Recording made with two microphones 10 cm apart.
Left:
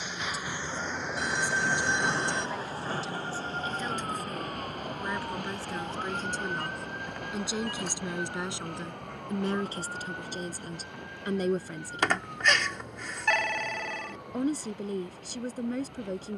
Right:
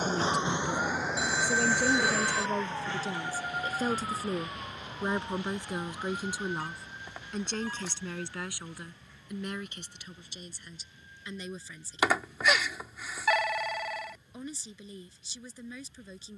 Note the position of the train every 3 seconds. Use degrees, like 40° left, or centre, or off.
10° left, 50° left, 60° left, 60° left, 60° left, 60° left.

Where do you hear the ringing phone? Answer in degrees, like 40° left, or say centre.
10° right.